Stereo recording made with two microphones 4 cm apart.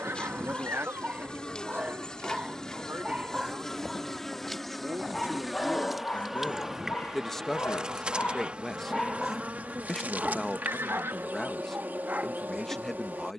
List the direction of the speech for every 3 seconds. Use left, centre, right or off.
right, right, centre, centre, centre.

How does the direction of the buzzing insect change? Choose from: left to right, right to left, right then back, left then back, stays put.
left to right.